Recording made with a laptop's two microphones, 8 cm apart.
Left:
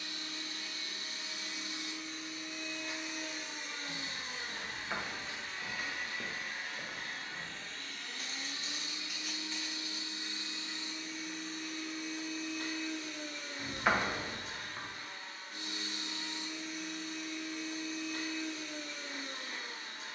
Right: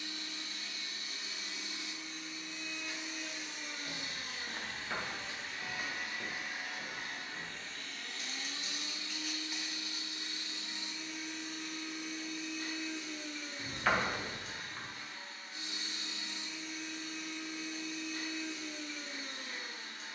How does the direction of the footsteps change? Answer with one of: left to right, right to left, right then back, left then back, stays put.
left then back.